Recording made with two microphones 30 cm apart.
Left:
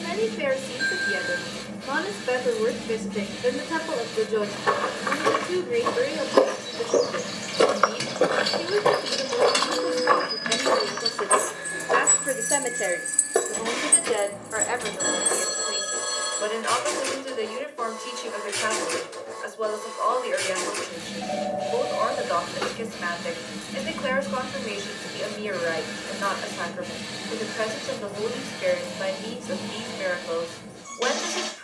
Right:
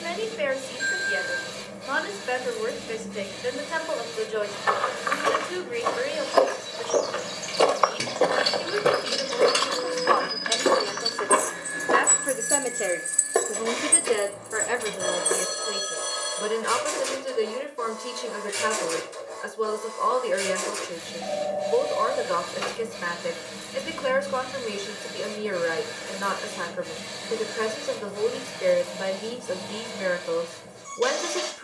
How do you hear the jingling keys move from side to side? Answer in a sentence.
You can hear the jingling keys move from right to left and back again.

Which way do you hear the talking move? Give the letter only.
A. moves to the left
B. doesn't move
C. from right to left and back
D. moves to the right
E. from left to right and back
D.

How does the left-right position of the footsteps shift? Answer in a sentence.
You can hear the footsteps go from the left side to the right.